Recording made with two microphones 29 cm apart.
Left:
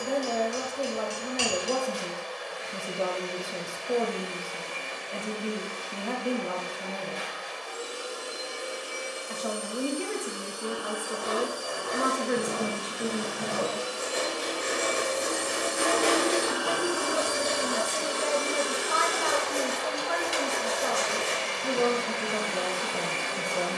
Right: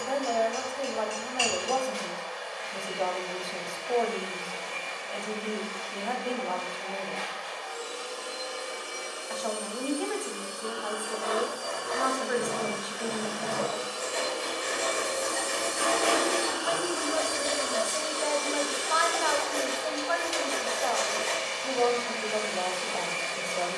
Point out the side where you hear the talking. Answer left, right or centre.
left.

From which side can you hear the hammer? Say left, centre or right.
left.